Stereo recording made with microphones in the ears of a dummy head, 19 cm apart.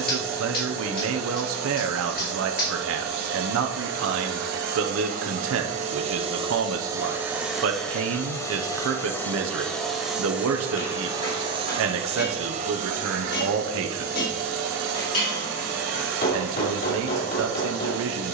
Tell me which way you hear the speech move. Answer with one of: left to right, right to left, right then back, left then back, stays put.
stays put.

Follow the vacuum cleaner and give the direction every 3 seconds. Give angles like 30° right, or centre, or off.
60° right, 50° right, centre, 10° right, 40° right, 60° right.